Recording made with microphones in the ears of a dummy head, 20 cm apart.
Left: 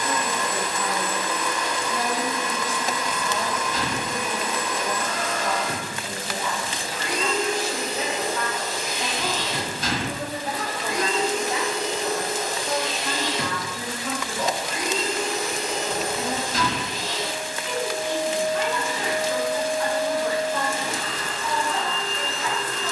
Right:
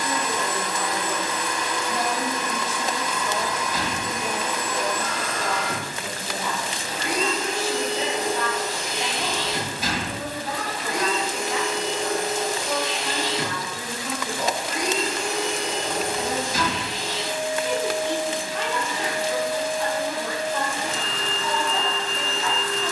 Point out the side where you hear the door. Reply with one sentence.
You can hear the door in the centre.